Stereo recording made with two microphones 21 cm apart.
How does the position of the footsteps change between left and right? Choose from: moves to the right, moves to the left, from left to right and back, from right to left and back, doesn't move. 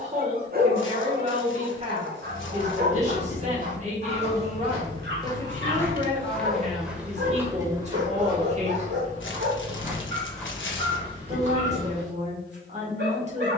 from left to right and back.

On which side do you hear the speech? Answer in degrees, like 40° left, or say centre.
30° right.